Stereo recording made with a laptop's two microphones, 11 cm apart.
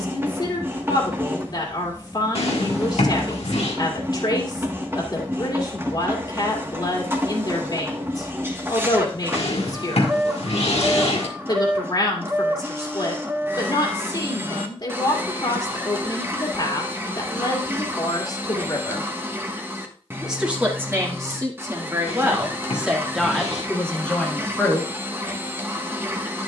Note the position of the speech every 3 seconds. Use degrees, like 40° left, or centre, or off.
40° left, 40° left, 40° left, 40° left, 40° left, 40° left, 20° left, 10° right, 20° left.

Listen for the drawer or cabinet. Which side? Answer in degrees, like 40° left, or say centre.
80° left.